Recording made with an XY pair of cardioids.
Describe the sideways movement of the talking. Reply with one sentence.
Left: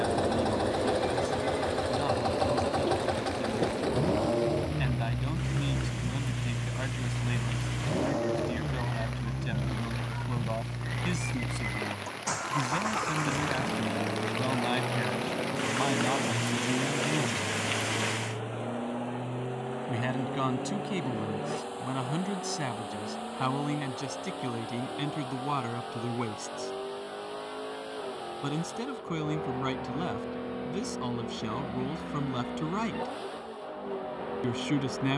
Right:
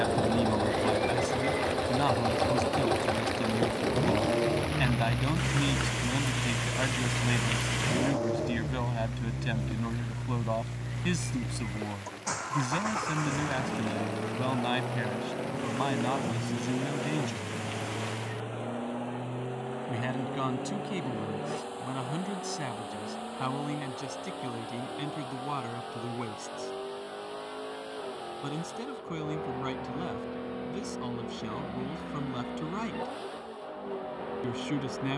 In this clip you hear the talking go from the right side to the left.